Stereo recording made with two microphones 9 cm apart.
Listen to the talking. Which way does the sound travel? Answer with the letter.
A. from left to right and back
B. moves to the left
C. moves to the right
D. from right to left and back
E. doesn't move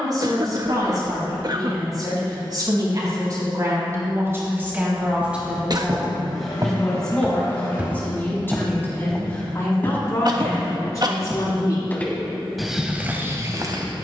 B.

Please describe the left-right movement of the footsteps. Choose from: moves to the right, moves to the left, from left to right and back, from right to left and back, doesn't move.
from right to left and back.